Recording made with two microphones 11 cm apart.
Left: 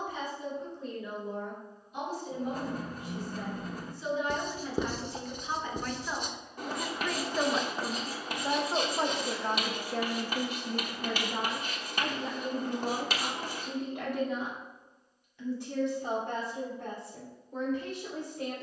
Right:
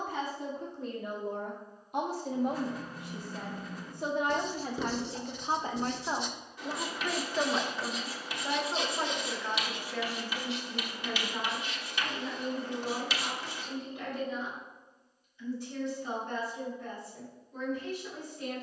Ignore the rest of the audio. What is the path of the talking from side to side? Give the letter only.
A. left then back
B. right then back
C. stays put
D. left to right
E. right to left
E.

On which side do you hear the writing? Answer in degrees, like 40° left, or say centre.
50° left.